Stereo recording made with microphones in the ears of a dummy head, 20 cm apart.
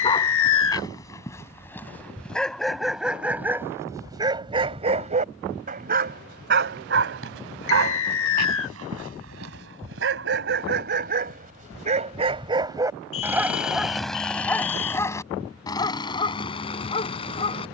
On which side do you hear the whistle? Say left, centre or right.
left.